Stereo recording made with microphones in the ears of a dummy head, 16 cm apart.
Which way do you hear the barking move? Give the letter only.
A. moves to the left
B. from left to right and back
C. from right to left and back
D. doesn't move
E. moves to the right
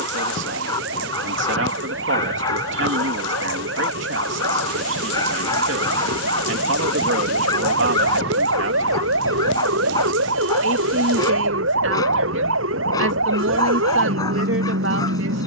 D.